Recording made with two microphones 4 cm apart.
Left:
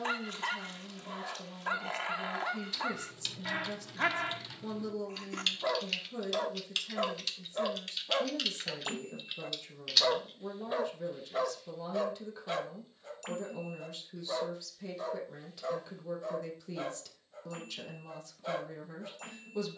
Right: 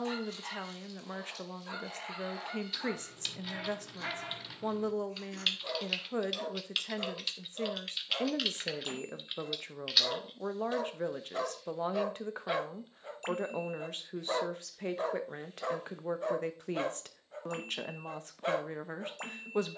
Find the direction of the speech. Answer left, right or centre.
right.